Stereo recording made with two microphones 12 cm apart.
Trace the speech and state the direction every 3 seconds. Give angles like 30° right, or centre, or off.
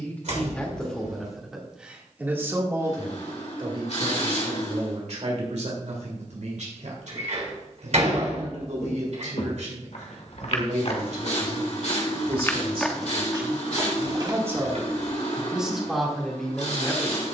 centre, 50° right, 80° right, 70° right, 30° right, centre.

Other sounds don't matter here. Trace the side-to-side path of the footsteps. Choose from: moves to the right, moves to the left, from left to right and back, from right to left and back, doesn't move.
moves to the right.